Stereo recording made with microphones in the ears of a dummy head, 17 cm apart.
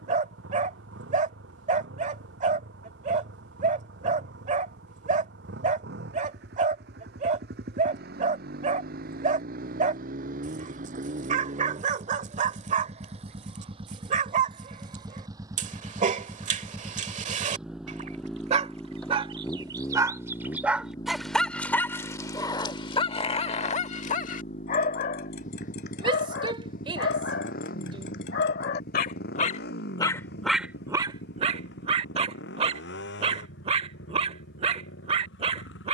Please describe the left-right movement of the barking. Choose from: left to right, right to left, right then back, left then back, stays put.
left then back.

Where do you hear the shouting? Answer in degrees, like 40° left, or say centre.
30° right.